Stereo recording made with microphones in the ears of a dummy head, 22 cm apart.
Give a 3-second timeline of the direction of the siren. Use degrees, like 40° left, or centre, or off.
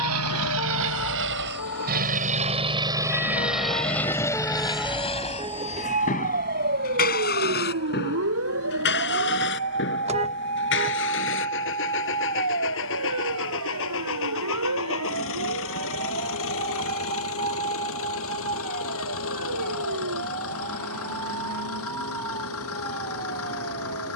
60° left, 10° left, 50° right, 60° right, 70° right, 70° right, 70° right, 70° right.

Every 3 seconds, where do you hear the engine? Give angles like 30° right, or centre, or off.
50° right, 10° left, 40° left, 50° left, 60° left, 60° left, 60° left, 60° left.